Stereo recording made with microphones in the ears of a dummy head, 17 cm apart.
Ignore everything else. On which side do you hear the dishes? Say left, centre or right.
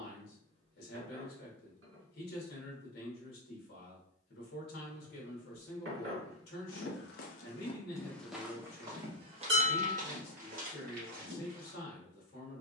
right.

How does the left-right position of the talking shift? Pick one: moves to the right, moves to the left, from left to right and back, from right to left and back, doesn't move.
doesn't move.